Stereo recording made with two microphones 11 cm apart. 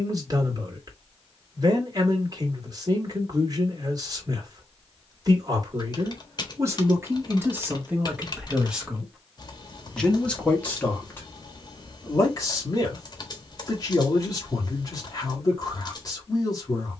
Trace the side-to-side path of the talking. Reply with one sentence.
You can hear the talking go from the right side to the left.